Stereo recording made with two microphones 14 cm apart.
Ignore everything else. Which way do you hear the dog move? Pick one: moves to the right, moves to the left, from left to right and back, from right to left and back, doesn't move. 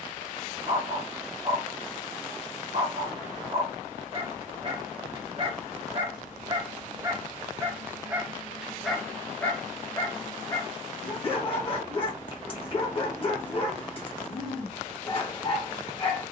moves to the left.